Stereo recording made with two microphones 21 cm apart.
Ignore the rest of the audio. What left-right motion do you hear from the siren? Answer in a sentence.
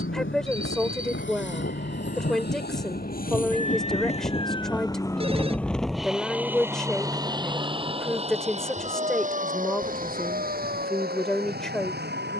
You can hear the siren move to the right.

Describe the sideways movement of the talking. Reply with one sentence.
You can hear the talking stay in one place.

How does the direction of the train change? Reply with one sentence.
You can hear the train move to the right.